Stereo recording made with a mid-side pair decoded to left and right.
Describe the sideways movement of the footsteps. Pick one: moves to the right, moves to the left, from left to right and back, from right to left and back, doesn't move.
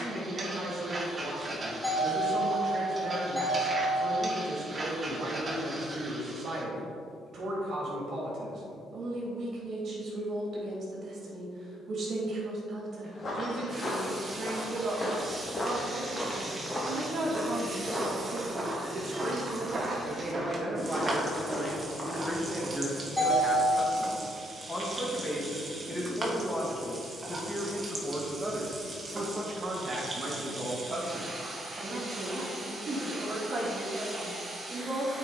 from left to right and back.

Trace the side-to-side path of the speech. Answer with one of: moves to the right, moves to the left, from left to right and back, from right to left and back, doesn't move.
from right to left and back.